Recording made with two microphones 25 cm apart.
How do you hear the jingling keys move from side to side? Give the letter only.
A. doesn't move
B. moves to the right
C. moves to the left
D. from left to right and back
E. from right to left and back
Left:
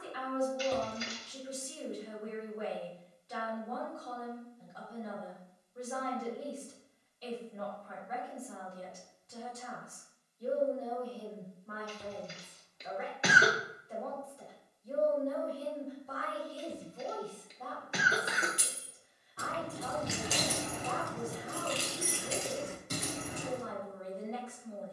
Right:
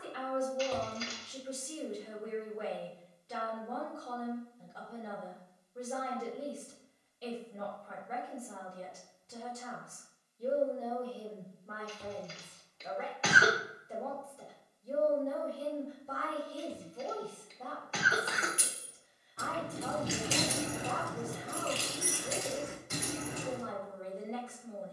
D.